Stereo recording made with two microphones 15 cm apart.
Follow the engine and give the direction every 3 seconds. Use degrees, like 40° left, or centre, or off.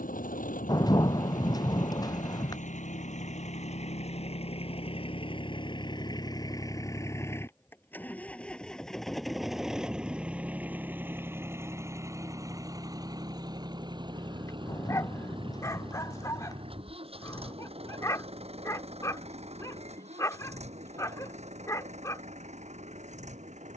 60° left, 40° left, 20° left, 10° right, 30° right, 40° right, 40° right, 50° right.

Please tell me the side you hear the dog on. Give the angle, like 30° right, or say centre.
20° left.